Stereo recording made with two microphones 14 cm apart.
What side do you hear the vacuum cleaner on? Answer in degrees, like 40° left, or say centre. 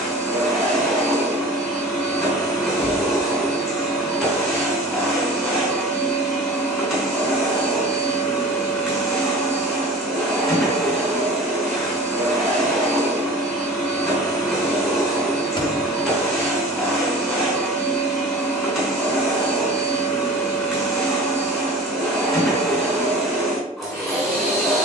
centre.